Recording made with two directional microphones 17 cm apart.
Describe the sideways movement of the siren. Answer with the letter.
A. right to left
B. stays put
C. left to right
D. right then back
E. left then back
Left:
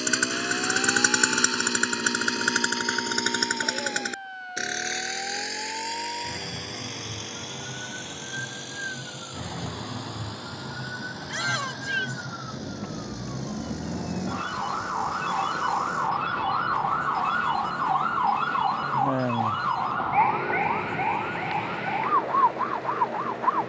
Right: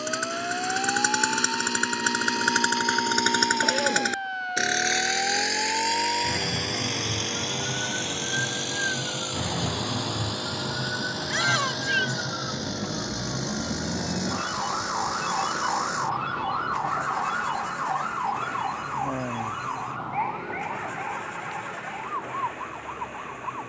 A.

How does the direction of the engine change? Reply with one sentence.
You can hear the engine move from left to right.